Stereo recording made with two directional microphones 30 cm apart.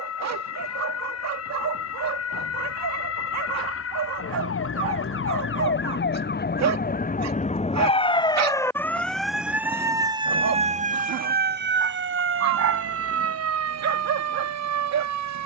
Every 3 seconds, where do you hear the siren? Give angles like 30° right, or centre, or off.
60° left, 50° left, 20° left, 20° right, 50° right.